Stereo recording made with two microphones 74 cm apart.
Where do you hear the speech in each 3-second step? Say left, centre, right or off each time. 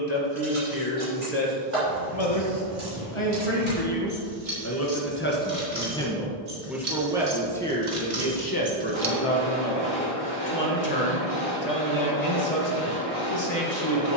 left, left, centre, left, left.